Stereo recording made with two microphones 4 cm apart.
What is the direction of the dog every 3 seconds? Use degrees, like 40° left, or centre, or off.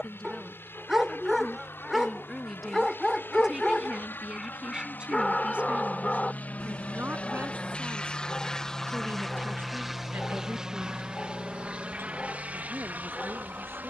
10° right, 10° left, 20° left, 20° left, 20° left.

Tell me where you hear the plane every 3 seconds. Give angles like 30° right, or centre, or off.
70° left, 60° left, 30° left, 10° right, 40° right.